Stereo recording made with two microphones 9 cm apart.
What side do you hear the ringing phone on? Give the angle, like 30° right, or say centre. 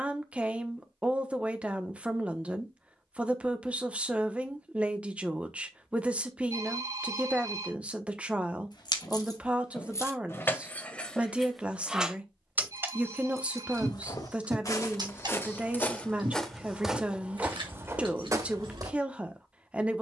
30° right.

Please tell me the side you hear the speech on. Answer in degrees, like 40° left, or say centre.
10° right.